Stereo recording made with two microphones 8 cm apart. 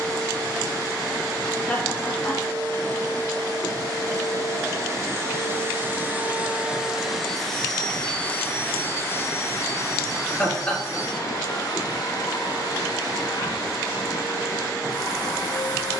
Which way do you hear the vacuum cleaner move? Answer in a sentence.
In this clip you hear the vacuum cleaner travel towards the left.